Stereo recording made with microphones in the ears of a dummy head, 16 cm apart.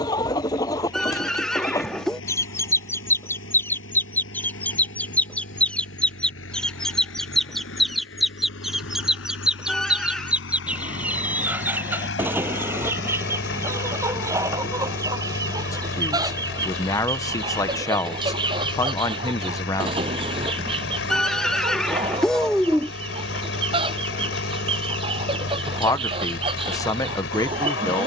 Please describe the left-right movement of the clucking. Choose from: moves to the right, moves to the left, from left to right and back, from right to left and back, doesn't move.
moves to the right.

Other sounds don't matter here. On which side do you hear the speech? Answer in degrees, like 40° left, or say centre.
20° left.